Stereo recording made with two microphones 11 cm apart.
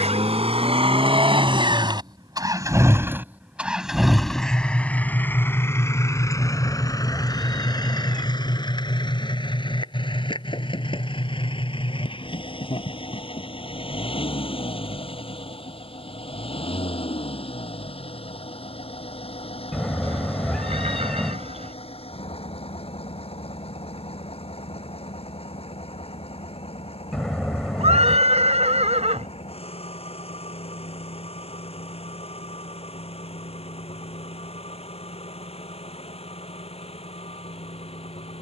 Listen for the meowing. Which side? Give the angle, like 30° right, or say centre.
centre.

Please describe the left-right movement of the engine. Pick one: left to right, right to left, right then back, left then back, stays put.
right to left.